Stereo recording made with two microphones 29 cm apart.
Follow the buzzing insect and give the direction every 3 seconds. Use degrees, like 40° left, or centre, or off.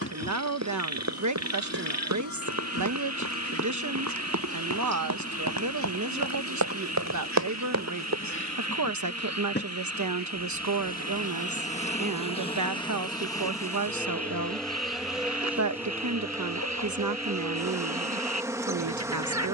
50° left, 50° left, 50° left, 30° left, 10° left, 10° right, 10° right.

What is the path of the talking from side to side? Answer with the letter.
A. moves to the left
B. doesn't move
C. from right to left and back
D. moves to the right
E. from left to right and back
B.